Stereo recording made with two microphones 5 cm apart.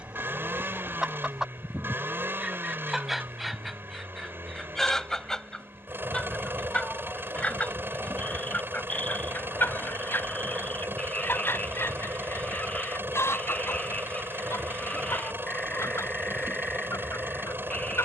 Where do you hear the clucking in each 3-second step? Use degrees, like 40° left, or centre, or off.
10° right, centre, 30° left, 50° left, 70° left, 80° left.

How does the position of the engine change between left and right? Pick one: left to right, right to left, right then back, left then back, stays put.
stays put.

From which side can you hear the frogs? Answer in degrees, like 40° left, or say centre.
30° left.